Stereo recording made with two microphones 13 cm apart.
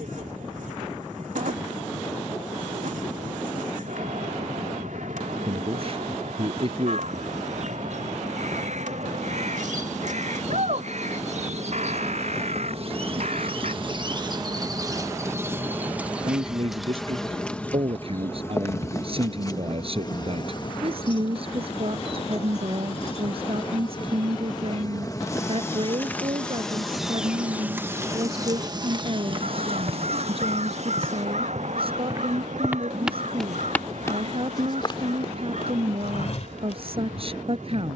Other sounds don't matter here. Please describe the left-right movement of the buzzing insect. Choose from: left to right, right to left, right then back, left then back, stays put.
left then back.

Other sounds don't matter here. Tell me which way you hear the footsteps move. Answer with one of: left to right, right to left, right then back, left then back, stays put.
right to left.